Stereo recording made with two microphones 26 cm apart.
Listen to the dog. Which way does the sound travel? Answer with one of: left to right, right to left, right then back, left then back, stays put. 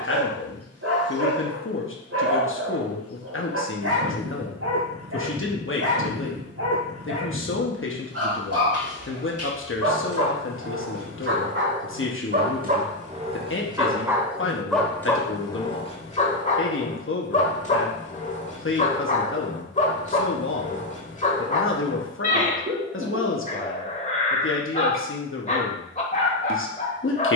right to left.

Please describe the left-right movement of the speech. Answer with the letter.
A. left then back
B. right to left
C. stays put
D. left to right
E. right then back
C.